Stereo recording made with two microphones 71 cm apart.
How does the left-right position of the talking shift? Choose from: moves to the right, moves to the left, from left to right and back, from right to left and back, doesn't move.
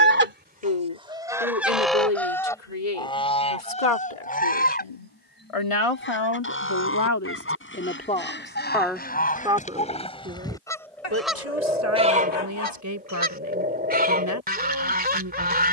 moves to the right.